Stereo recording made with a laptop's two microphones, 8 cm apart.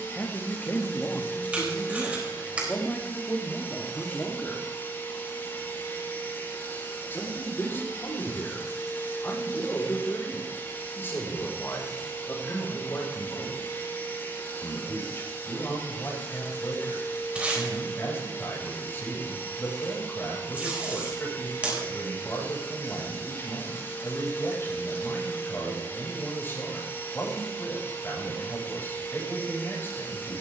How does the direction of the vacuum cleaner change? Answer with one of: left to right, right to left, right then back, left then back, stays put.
stays put.